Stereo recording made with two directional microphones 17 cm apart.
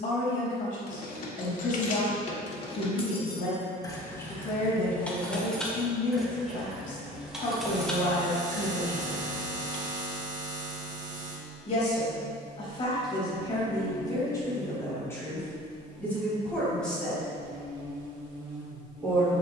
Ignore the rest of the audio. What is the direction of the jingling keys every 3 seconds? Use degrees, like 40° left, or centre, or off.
50° left, 10° left, centre, 40° left, off, off, off.